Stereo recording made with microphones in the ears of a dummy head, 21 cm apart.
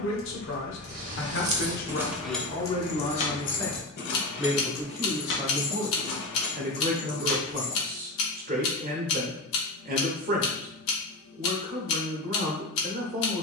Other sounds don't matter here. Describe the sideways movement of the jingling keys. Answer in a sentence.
You can hear the jingling keys move to the left.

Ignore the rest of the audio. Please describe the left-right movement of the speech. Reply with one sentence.
In this clip you hear the speech move from left to right.